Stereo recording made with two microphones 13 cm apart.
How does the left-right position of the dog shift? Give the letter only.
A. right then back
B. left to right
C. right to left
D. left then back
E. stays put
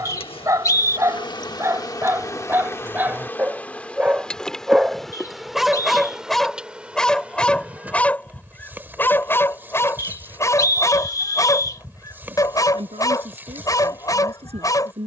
C.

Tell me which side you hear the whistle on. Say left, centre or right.
left.